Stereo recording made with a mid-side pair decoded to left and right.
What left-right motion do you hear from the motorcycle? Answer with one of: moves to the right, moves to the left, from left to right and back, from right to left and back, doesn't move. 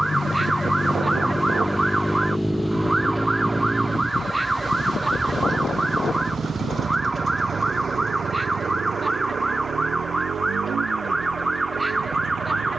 moves to the right.